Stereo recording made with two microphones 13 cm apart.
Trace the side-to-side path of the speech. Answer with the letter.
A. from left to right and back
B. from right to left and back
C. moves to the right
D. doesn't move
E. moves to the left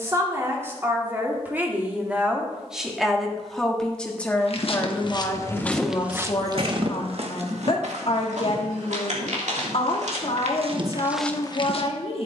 E.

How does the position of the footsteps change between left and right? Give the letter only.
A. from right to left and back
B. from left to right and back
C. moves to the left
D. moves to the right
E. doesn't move
B.